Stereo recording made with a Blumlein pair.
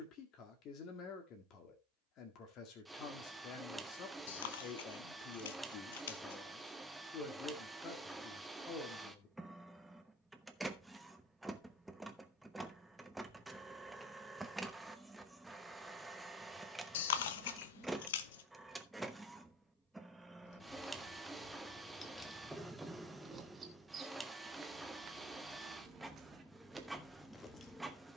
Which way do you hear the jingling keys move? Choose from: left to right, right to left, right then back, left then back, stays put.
right then back.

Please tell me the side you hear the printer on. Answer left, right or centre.
centre.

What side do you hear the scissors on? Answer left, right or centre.
left.